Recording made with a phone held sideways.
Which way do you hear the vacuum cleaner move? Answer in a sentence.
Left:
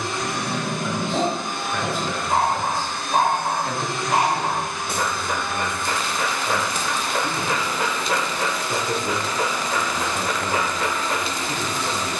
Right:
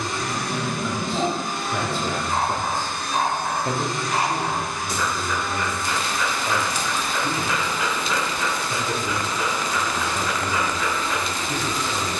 In this clip you hear the vacuum cleaner stay put.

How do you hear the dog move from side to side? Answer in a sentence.
You can hear the dog stay in one place.